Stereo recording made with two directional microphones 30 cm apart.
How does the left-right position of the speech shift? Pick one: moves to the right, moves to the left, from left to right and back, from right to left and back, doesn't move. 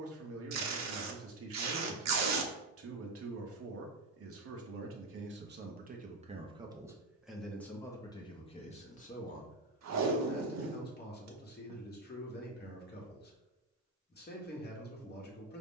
moves to the left.